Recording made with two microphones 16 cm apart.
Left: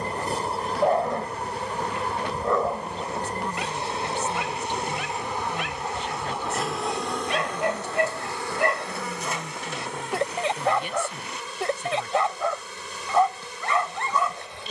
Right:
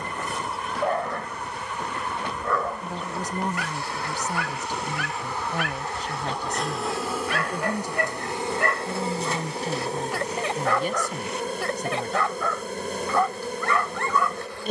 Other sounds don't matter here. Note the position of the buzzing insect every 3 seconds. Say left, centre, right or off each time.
left, left, centre, right, right.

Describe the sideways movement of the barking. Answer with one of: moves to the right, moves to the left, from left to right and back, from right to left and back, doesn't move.
doesn't move.